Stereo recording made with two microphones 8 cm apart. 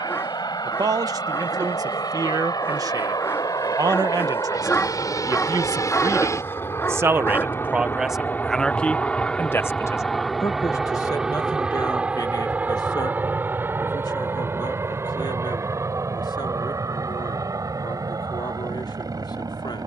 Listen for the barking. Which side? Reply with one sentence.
You can hear the barking on the left.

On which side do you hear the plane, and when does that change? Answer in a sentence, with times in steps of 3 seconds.
In this clip you hear the plane on the left from 0 s, in the centre from 9 s and on the right from 12 s.